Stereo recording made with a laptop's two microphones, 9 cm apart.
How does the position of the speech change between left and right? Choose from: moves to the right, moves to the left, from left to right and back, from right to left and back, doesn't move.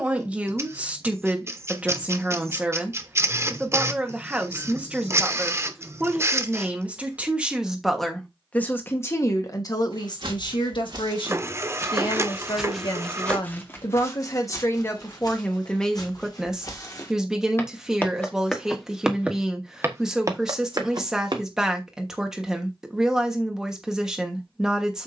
from right to left and back.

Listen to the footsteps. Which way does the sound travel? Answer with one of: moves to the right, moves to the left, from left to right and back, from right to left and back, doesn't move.
from right to left and back.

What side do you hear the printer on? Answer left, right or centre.
right.